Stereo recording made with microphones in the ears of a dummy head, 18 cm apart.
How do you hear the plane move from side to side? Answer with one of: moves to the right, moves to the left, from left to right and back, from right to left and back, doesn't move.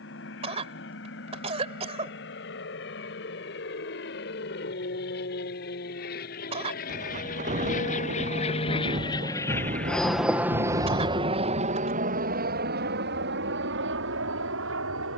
moves to the right.